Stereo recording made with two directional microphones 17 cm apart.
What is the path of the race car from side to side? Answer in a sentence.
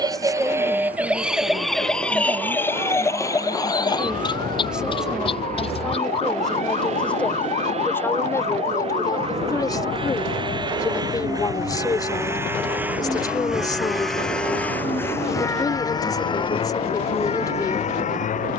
In this clip you hear the race car move from right to left.